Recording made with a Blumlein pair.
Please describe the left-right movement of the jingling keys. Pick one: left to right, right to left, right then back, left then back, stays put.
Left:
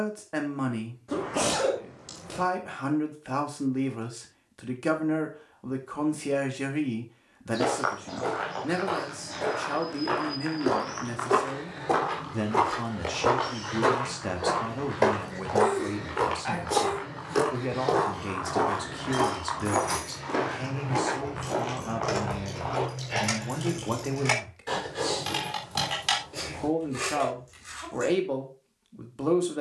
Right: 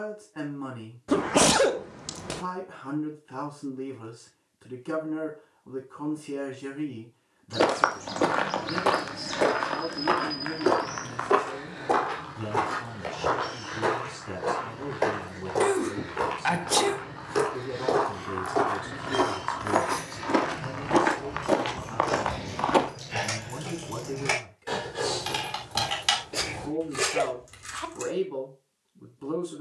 left to right.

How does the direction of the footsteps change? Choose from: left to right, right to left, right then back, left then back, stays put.
left then back.